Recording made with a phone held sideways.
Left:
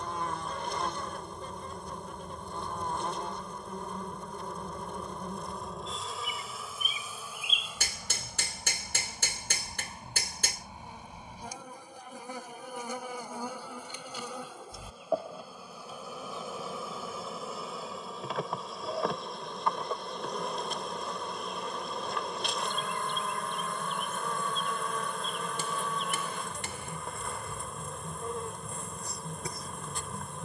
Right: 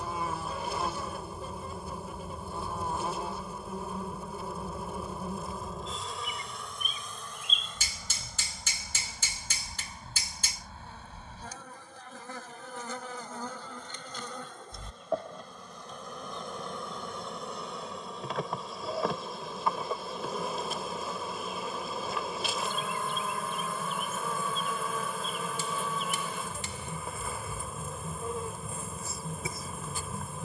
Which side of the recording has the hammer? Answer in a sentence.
In this clip you hear the hammer on the left.